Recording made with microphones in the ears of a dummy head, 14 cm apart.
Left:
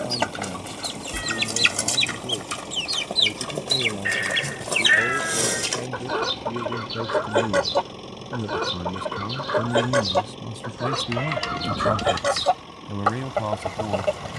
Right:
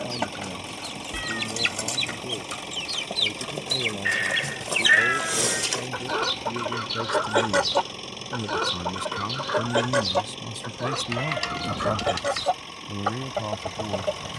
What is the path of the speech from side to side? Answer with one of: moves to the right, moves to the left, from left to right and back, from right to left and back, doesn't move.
moves to the left.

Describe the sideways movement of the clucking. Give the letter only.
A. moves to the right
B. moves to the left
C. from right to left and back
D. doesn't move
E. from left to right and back
E.